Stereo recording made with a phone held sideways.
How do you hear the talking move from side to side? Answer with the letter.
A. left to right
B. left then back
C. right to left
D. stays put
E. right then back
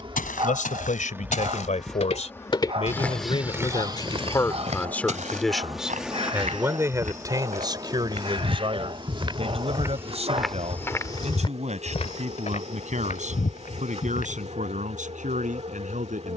A.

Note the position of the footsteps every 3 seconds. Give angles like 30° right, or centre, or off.
60° left, 30° right, 60° right, centre, 60° left, off.